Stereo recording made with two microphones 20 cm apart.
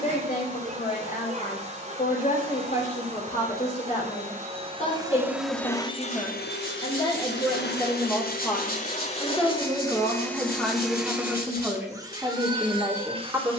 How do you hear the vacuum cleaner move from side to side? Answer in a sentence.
In this clip you hear the vacuum cleaner go left and come back.